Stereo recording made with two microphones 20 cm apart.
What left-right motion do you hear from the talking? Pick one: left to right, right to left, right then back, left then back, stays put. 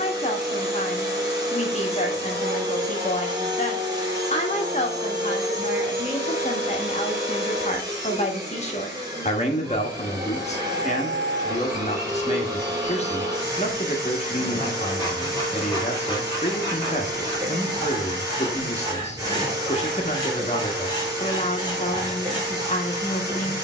stays put.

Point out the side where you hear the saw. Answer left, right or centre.
left.